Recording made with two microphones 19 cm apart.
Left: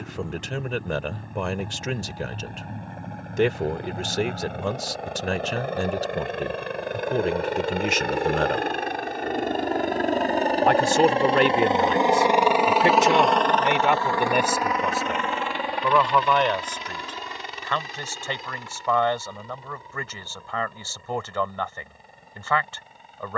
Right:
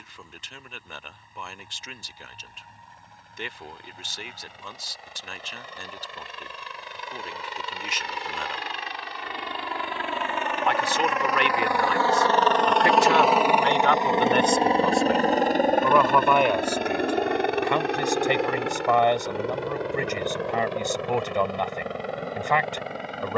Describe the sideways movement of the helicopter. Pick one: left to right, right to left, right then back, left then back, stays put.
left to right.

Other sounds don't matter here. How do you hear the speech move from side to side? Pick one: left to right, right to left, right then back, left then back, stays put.
left to right.